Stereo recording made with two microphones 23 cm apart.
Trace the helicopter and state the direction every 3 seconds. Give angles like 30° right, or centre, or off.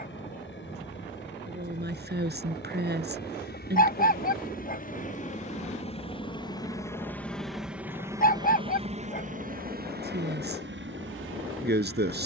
60° left, 40° left, centre, 50° right.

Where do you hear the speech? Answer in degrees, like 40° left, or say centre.
50° right.